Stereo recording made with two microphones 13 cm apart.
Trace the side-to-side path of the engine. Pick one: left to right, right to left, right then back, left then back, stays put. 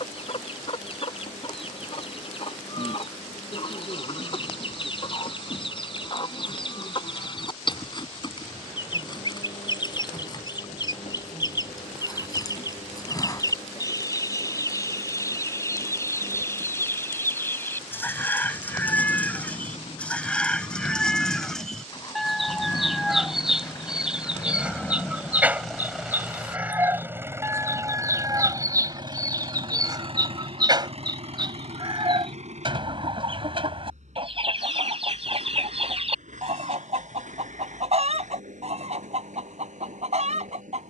left to right.